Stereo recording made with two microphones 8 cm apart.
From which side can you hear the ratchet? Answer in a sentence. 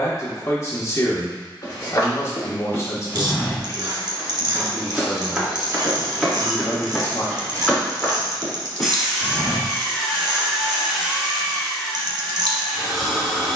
You can hear the ratchet on the right.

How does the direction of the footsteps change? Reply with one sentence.
You can hear the footsteps move from left to right and back again.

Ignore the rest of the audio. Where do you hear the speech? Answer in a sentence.
You can hear the speech on the left.